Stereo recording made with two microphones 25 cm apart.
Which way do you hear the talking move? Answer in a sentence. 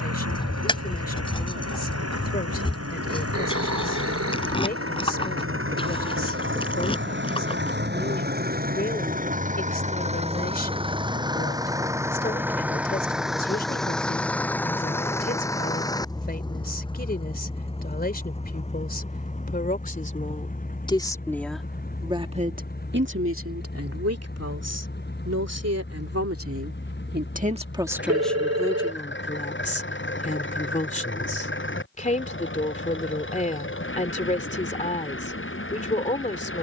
You can hear the talking move from left to right and back again.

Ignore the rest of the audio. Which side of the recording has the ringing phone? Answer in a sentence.
In this clip you hear the ringing phone on the right.